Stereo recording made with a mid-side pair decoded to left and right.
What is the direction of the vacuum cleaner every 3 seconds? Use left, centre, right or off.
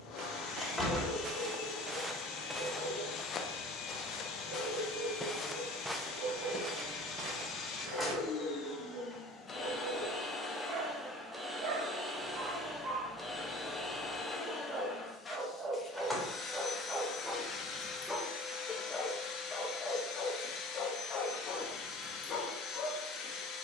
left, left, left, centre, centre, left, left, left.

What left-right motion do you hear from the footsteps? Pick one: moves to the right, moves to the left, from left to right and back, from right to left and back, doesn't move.
from right to left and back.